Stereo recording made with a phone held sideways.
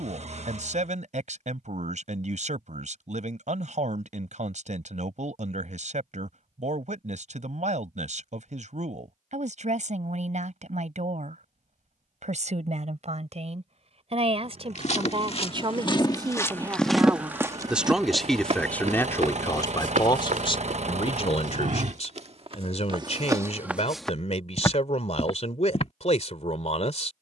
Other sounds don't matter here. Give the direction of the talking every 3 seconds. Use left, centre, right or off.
right, right, right, right, right, right, left, left, left.